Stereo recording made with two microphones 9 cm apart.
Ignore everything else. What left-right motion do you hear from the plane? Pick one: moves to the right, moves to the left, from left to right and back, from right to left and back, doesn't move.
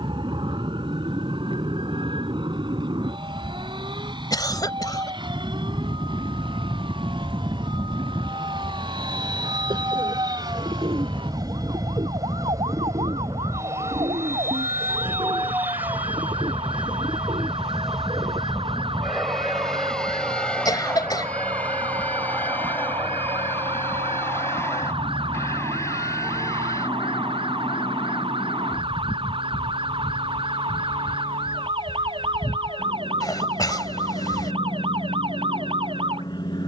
moves to the left.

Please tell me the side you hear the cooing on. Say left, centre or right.
right.